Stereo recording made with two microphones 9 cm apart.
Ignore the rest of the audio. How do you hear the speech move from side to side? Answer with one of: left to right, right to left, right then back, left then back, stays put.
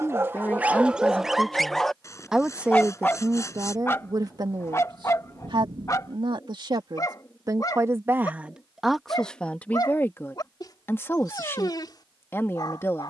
right then back.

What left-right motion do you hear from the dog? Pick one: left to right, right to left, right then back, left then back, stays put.
right to left.